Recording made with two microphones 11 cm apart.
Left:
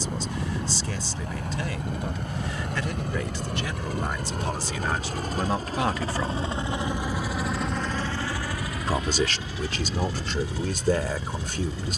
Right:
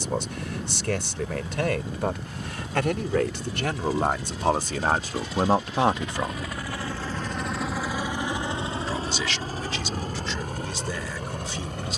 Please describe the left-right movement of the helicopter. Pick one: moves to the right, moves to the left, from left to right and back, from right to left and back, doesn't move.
moves to the right.